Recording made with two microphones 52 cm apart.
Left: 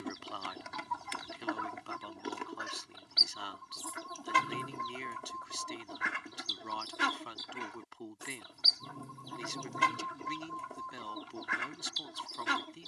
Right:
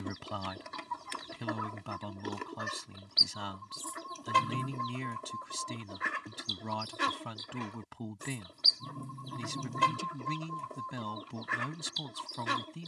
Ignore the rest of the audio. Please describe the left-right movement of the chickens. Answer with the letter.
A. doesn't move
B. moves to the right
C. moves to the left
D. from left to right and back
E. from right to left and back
A.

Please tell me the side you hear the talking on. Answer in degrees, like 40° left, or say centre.
70° right.